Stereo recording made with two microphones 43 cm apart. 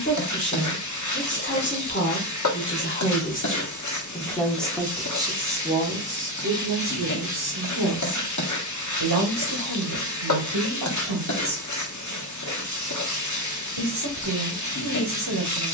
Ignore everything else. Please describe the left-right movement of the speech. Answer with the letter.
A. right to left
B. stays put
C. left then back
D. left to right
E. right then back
D.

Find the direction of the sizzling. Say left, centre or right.
left.